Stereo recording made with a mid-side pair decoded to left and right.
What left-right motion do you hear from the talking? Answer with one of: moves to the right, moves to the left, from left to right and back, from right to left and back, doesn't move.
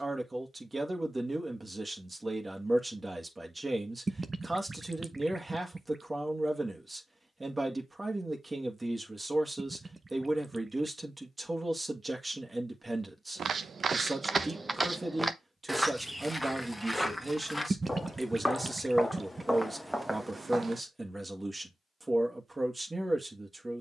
doesn't move.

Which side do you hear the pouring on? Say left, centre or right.
right.